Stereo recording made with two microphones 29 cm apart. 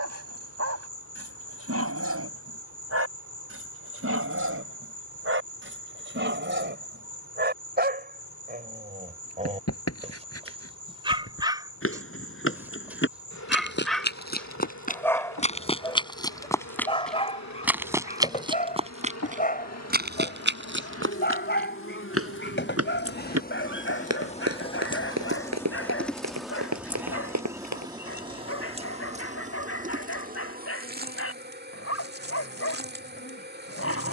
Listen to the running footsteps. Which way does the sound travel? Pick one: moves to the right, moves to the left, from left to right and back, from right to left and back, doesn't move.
moves to the right.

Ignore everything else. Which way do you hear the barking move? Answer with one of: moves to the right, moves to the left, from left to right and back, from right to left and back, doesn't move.
moves to the left.